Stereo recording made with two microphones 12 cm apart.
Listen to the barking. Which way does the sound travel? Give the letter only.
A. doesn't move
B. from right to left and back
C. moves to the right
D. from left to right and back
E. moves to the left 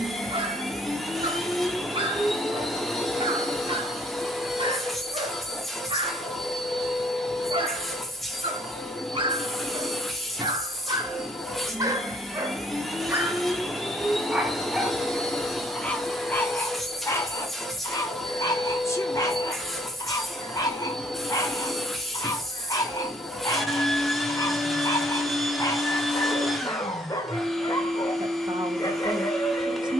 E.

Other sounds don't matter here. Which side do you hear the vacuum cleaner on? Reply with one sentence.
You can hear the vacuum cleaner in the centre.